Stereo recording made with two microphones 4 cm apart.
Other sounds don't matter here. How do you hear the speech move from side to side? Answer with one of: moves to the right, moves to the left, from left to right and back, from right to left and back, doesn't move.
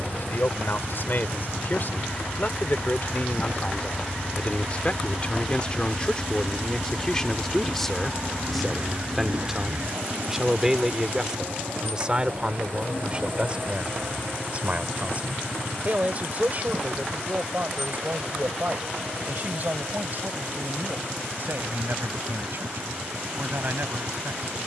moves to the right.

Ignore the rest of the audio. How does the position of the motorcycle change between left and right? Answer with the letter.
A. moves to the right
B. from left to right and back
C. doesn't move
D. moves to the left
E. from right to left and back
A.